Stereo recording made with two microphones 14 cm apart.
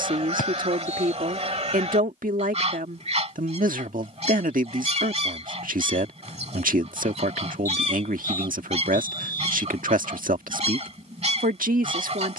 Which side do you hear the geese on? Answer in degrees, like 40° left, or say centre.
50° right.